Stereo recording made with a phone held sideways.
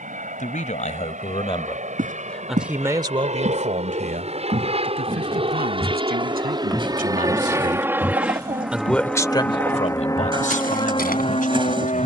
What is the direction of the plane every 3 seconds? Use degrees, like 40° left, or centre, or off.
60° right, 40° right, 20° right, 20° left.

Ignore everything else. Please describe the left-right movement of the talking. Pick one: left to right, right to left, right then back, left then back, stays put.
right then back.